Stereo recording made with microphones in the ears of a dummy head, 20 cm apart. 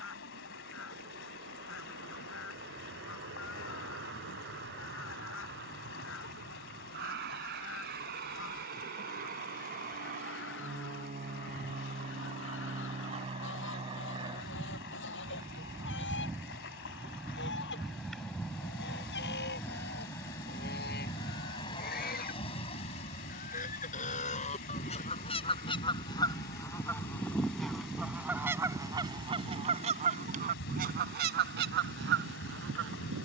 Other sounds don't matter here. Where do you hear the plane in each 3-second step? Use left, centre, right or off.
right, right, right, right, right, centre, centre, left, left, left, left.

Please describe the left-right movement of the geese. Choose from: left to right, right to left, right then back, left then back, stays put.
left to right.